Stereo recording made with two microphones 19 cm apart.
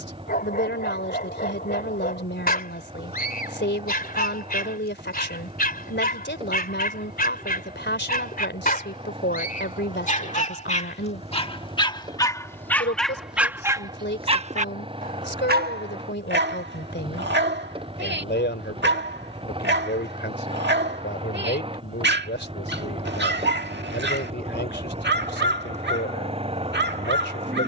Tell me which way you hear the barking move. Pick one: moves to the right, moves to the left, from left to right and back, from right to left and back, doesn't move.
moves to the right.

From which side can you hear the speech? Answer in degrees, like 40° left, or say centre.
70° left.